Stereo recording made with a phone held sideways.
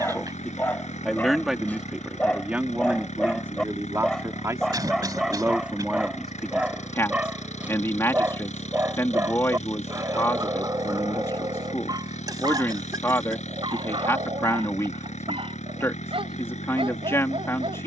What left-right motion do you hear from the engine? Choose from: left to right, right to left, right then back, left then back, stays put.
stays put.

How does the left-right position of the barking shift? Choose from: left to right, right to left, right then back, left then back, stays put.
left to right.